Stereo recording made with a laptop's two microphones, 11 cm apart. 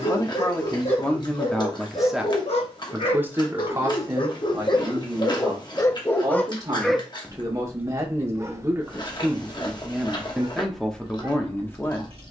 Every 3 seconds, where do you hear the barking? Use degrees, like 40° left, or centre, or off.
70° left, 40° left, 10° right, 50° right.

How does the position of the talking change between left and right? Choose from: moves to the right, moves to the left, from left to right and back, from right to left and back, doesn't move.
from left to right and back.